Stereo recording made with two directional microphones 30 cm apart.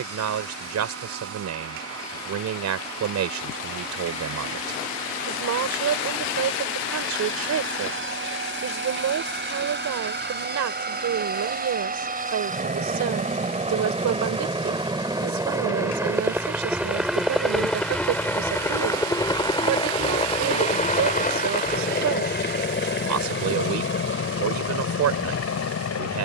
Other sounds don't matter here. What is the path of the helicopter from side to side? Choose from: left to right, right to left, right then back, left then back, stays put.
right to left.